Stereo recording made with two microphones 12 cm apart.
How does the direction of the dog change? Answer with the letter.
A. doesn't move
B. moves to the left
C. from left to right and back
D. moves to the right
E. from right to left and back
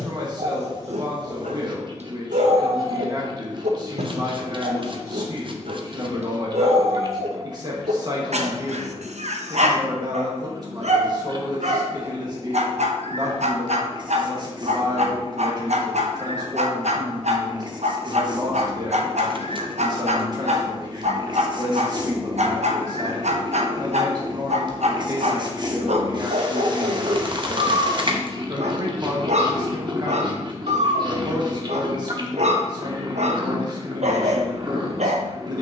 A.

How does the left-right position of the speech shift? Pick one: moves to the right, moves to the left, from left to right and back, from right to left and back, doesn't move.
doesn't move.